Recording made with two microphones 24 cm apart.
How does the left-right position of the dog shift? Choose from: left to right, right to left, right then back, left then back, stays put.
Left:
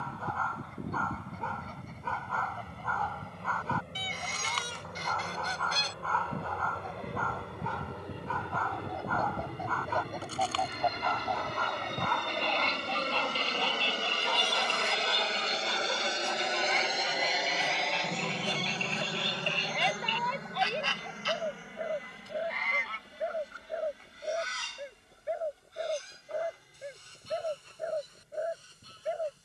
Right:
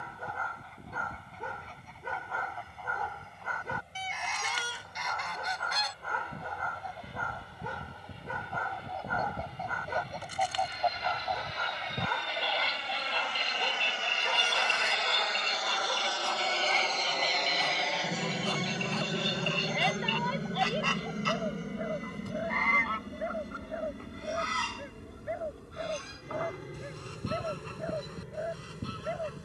right to left.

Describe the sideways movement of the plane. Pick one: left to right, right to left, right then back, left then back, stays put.
left to right.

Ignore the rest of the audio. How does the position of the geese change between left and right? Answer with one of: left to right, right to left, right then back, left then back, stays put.
left to right.